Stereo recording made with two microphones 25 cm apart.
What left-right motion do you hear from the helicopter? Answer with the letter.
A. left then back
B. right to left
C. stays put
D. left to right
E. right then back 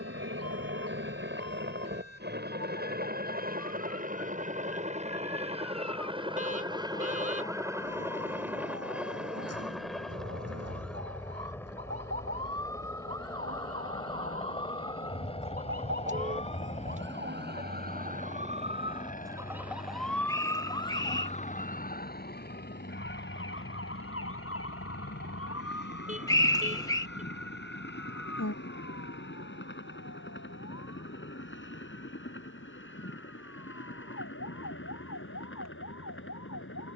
B.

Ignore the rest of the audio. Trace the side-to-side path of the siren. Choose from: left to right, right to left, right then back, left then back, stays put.
right to left.